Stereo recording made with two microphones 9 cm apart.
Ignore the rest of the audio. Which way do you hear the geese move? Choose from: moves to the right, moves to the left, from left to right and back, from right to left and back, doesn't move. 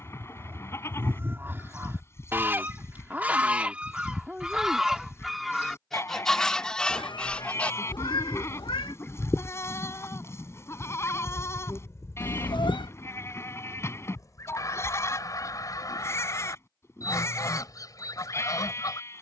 moves to the left.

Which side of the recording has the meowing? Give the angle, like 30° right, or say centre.
60° left.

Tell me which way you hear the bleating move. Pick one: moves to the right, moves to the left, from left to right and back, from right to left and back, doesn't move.
doesn't move.